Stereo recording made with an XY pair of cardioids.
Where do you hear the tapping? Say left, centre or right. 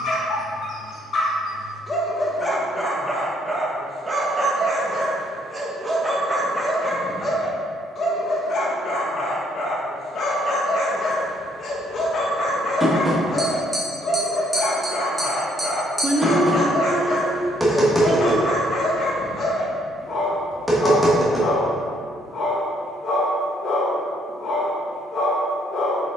centre.